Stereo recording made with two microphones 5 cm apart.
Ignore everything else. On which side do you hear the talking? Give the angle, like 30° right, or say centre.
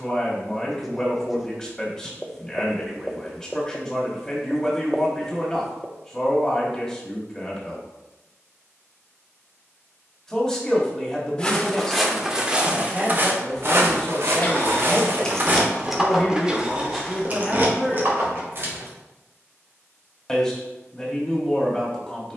10° left.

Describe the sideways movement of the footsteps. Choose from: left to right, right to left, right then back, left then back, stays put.
right then back.